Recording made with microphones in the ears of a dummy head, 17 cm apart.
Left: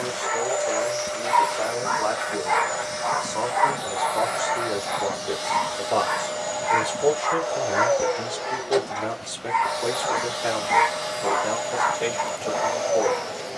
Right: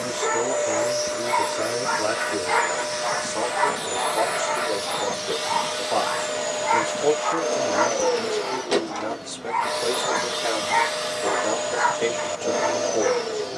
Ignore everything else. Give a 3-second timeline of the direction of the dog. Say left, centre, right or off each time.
right, centre, left, centre, right.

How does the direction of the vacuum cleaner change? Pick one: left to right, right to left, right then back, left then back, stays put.
stays put.